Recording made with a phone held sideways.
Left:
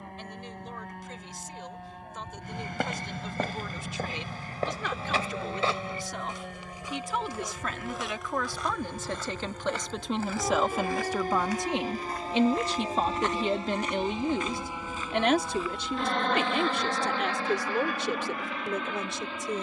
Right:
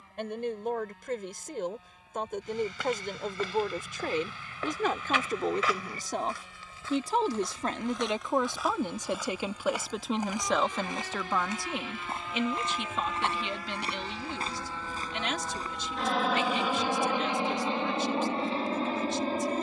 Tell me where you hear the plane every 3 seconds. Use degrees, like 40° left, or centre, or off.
80° left, 70° left, 70° left, 50° left, 30° left, 10° right, 30° right.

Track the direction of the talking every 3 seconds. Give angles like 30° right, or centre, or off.
60° right, 50° right, 30° right, centre, 40° left, 70° left, 70° left.